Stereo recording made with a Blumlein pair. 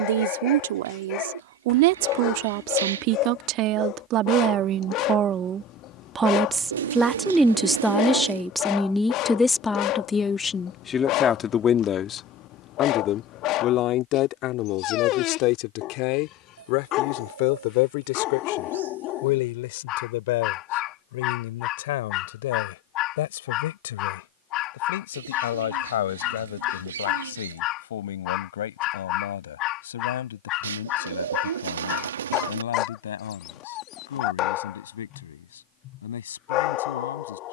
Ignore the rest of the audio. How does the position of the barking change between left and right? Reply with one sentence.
You can hear the barking stay in one place.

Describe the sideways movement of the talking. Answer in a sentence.
You can hear the talking move from right to left.